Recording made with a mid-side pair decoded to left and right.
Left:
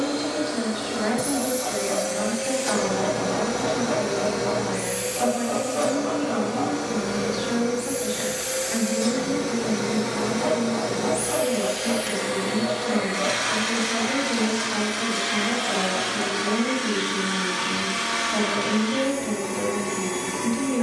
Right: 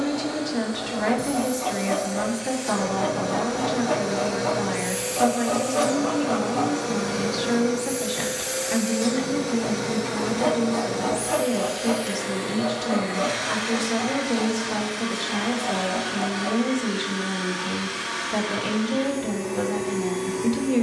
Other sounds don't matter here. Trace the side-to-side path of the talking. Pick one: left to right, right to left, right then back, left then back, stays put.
stays put.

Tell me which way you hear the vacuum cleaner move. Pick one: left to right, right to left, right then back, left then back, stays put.
right then back.